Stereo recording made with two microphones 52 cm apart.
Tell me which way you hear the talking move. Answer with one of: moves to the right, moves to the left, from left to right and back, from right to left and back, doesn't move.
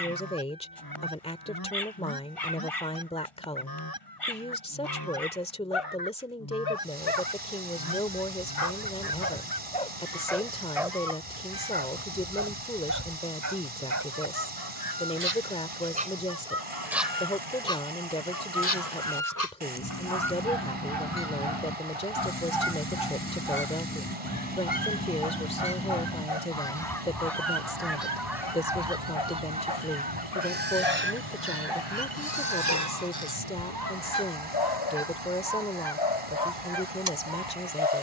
doesn't move.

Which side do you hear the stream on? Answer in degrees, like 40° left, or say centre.
80° right.